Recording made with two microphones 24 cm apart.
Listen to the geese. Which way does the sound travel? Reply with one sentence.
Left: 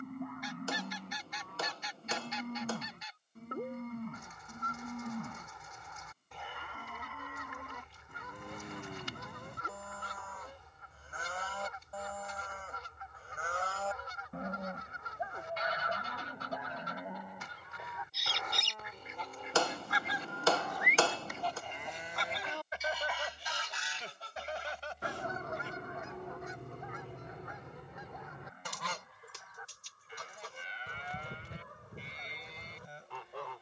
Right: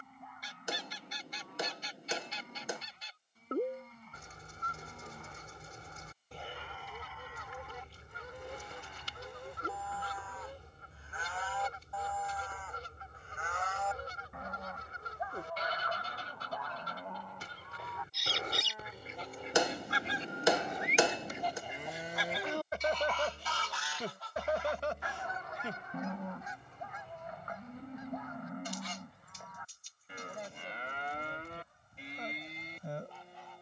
In this clip you hear the geese move to the left.